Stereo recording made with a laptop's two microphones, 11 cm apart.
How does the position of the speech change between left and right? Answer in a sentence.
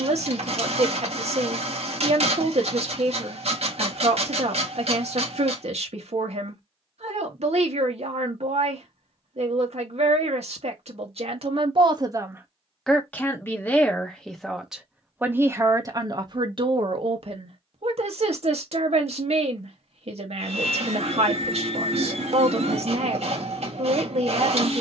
In this clip you hear the speech go left and come back.